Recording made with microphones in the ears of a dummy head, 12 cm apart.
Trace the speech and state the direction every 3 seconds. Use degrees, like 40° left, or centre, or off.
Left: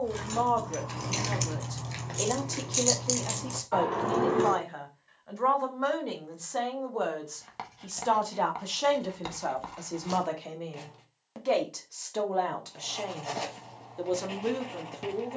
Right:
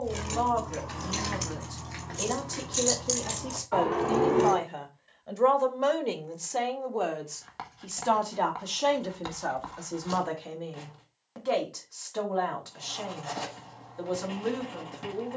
20° left, 10° right, 10° right, 20° left, 20° left.